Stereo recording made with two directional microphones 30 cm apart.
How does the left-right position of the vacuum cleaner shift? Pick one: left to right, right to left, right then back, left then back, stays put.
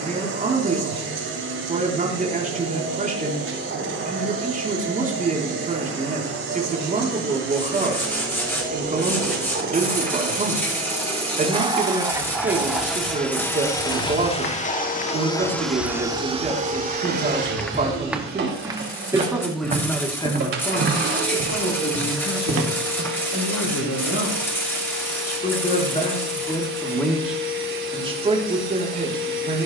left then back.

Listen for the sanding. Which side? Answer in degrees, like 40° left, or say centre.
10° left.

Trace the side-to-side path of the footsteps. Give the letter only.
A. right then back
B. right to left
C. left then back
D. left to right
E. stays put
D.